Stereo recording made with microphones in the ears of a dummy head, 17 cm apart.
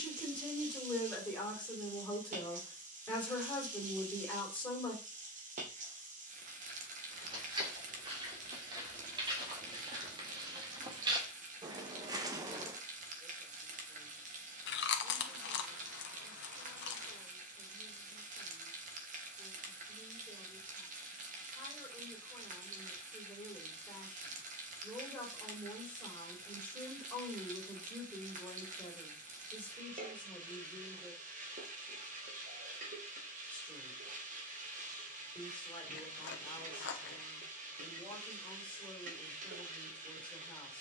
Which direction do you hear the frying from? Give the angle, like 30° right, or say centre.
40° right.